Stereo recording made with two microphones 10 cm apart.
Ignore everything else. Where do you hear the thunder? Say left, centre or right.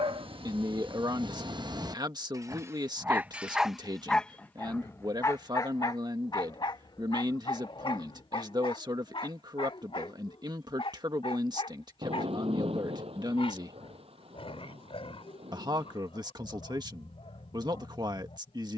right.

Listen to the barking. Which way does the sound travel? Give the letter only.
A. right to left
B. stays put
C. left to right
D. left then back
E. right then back
A.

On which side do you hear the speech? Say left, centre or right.
right.